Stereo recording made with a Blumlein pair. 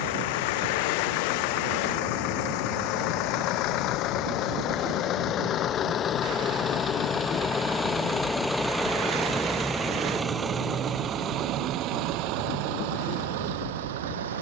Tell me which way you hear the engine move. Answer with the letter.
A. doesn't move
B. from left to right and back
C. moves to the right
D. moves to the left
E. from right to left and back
C.